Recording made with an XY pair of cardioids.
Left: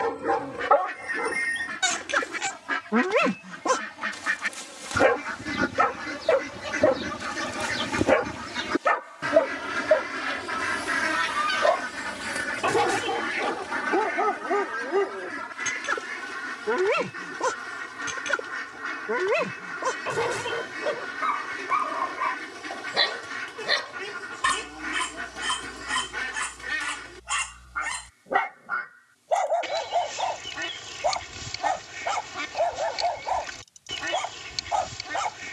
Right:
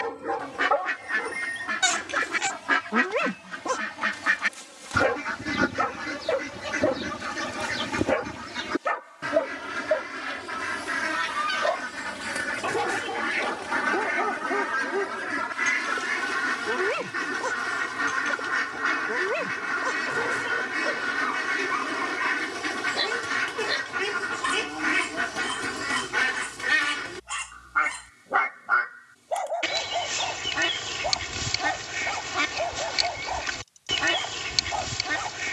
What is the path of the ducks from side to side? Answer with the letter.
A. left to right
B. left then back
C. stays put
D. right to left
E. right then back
B.